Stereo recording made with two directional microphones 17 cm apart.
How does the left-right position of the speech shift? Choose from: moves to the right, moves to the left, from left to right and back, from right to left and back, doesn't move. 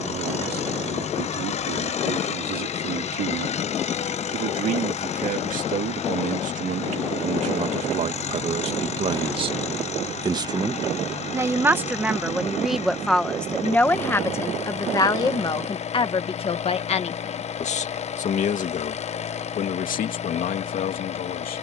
moves to the left.